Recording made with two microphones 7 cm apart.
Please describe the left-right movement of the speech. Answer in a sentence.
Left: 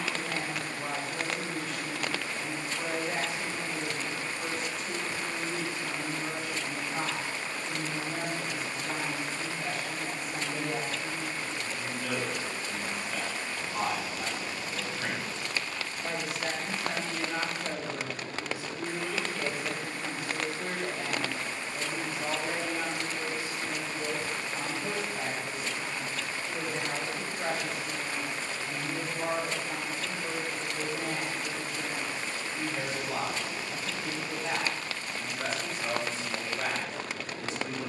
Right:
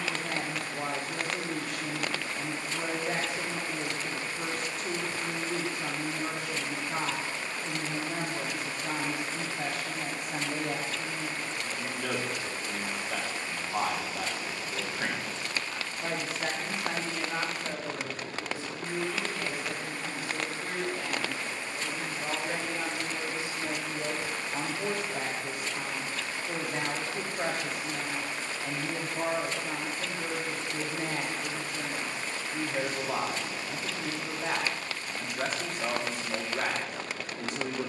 You can hear the speech go left and come back.